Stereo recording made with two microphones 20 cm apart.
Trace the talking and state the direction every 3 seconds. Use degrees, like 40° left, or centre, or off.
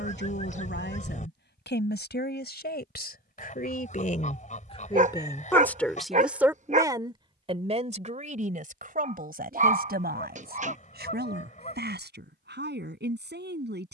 70° left, 30° left, 30° right, 60° right, 60° right.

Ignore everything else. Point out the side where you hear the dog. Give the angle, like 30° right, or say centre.
40° right.